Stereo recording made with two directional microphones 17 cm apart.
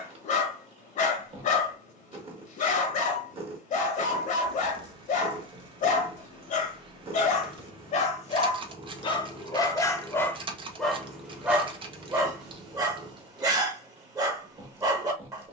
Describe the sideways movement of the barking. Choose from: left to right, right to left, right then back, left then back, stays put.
left to right.